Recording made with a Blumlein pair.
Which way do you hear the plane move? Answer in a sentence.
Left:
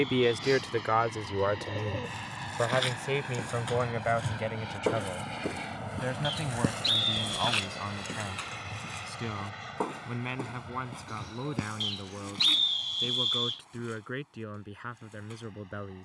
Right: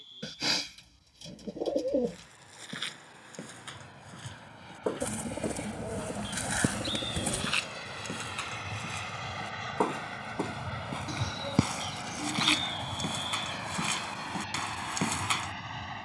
In this clip you hear the plane move to the right.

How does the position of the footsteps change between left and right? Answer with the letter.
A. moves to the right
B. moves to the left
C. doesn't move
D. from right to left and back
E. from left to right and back
A.